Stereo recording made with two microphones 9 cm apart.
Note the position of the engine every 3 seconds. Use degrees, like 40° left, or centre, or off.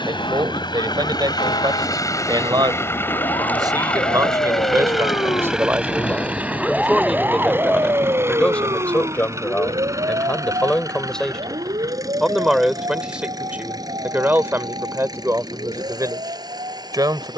50° left, 10° left, 20° right, 40° right, 40° right, 50° right.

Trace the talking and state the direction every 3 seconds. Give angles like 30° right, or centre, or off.
50° right, 40° right, centre, 10° left, 20° right, 40° right.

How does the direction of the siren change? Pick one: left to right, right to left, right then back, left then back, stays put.
left to right.